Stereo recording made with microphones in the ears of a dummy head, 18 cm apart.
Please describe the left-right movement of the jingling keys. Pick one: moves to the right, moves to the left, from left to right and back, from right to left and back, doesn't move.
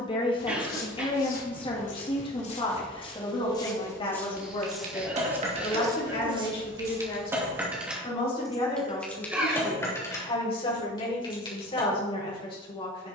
moves to the left.